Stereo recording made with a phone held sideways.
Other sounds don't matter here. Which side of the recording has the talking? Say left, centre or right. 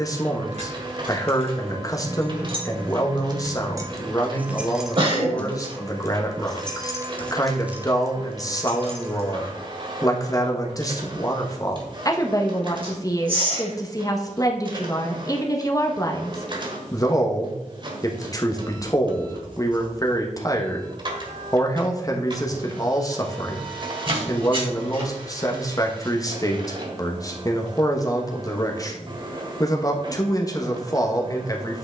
left.